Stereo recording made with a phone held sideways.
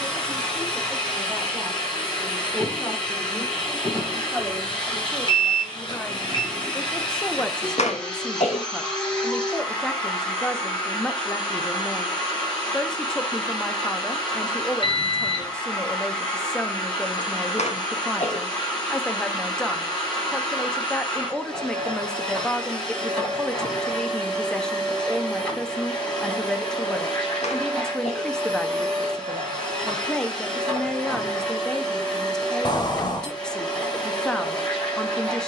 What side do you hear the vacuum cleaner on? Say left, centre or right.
centre.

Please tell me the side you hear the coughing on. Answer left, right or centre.
left.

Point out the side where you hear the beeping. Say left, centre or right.
left.